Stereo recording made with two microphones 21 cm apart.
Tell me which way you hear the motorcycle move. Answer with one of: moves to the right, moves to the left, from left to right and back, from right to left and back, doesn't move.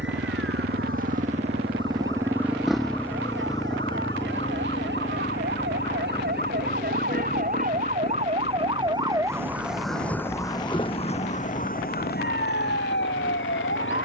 moves to the left.